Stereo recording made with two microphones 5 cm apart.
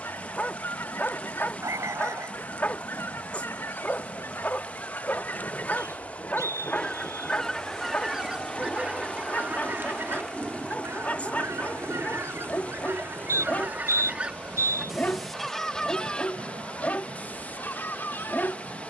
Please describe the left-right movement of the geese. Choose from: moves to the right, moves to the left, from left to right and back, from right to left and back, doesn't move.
from left to right and back.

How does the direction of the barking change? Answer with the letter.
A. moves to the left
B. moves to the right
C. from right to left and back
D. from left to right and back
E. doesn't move
E.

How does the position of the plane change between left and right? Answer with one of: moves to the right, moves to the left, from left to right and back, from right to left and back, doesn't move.
moves to the right.